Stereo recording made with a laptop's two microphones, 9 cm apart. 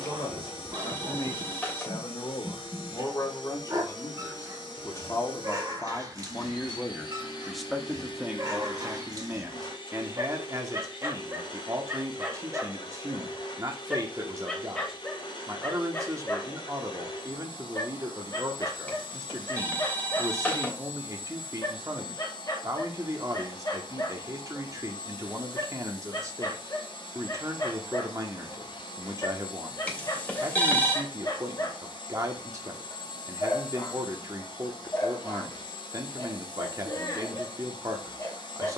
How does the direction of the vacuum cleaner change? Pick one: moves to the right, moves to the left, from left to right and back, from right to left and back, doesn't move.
doesn't move.